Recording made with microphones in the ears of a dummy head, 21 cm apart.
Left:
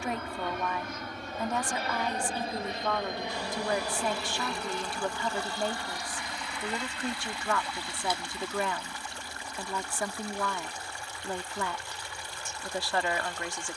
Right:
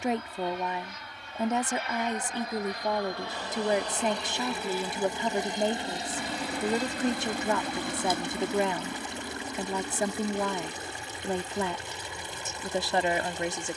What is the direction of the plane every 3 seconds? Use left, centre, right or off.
left, centre, right, right, right.